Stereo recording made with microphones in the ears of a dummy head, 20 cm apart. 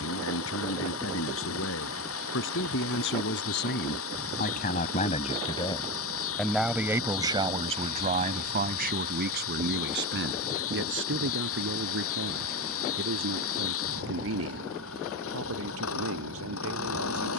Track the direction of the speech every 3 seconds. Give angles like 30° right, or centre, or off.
70° left, 40° left, 30° right, 60° right, 70° right, 70° right.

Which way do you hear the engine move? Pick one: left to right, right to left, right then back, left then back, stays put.
stays put.